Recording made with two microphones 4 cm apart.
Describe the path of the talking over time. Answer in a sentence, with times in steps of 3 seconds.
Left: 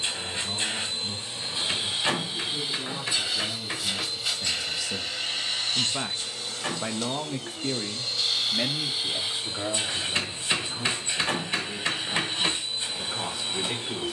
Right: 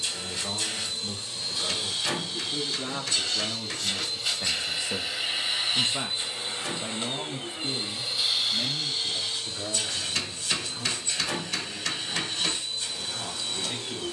In this clip you hear the talking on the right from 0 s and on the left from 6 s.